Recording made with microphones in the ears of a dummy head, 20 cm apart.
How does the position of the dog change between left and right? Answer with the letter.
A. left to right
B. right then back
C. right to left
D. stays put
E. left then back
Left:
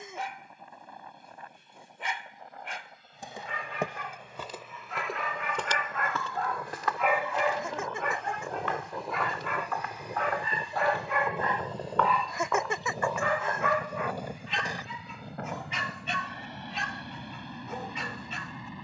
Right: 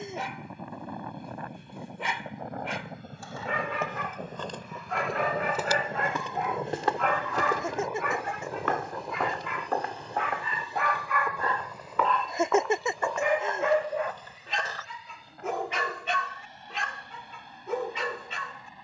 E.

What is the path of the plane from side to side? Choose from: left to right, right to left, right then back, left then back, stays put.
right to left.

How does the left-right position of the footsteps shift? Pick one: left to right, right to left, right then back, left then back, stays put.
right then back.